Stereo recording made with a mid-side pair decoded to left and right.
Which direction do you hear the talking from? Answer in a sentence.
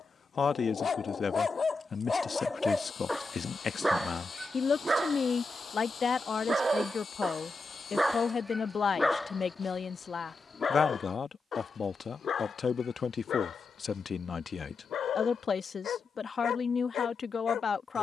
You can hear the talking on the left.